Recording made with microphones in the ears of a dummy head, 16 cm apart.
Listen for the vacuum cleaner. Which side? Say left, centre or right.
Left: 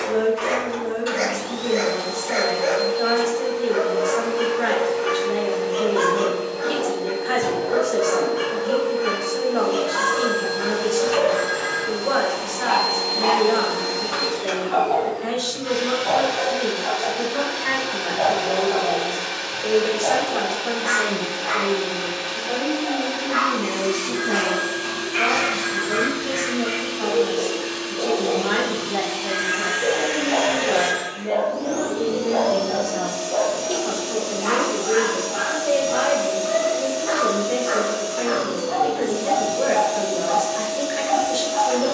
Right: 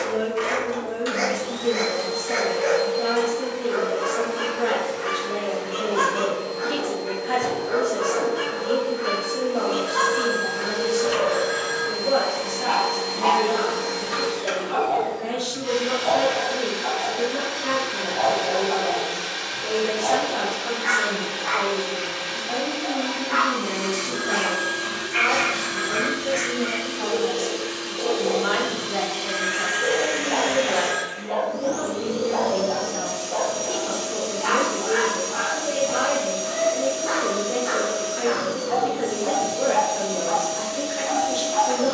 right.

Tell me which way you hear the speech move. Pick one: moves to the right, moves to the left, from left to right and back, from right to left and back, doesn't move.
from left to right and back.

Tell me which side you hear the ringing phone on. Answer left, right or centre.
right.